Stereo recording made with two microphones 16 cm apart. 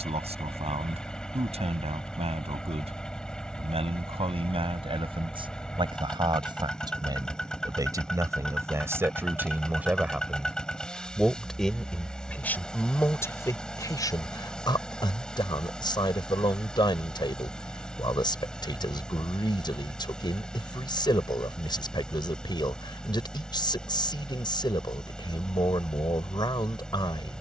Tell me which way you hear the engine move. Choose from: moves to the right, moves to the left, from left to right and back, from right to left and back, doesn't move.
doesn't move.